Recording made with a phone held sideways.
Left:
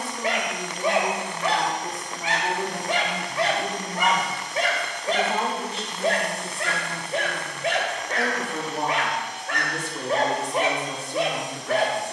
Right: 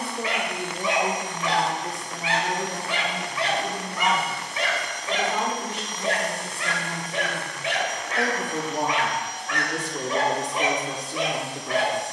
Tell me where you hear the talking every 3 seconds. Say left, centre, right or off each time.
centre, left, centre, right.